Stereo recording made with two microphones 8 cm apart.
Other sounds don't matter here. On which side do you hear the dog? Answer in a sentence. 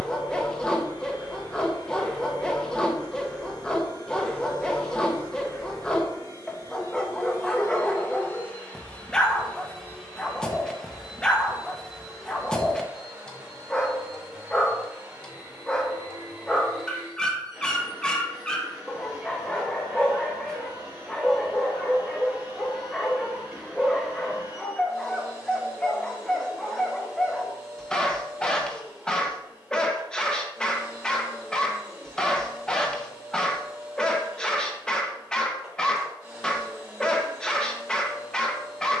You can hear the dog in the centre.